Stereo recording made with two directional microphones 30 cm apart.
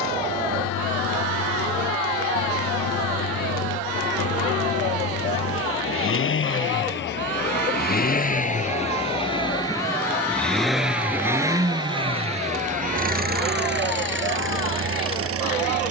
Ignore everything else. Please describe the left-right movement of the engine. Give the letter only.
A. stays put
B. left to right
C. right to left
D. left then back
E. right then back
B.